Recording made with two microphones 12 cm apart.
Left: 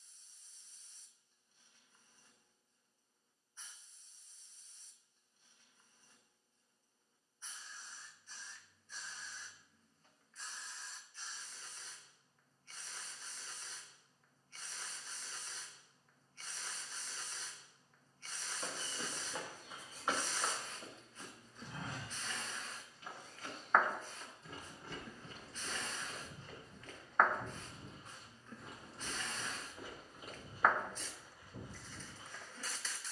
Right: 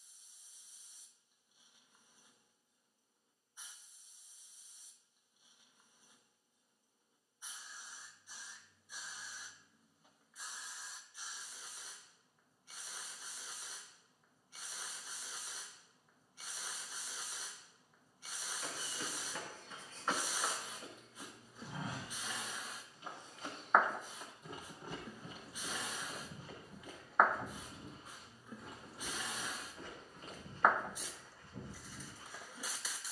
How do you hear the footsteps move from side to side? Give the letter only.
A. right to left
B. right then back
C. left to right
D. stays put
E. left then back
B.